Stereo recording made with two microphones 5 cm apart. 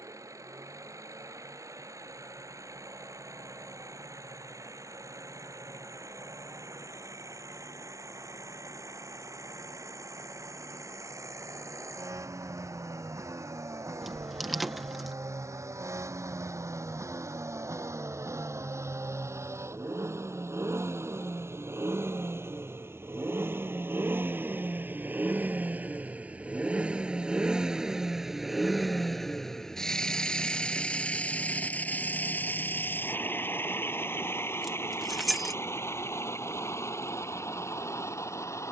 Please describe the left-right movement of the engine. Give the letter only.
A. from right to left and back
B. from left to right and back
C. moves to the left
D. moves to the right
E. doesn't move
C.